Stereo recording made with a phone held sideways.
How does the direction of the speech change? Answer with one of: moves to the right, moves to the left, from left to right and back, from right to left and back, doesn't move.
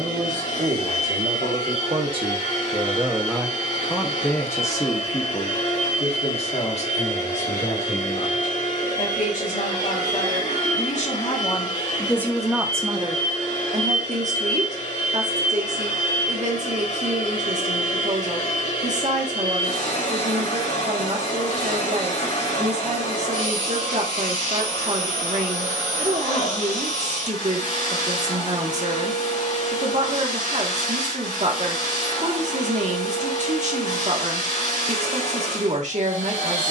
from right to left and back.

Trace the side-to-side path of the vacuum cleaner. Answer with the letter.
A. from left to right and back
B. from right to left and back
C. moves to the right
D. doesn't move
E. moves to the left
D.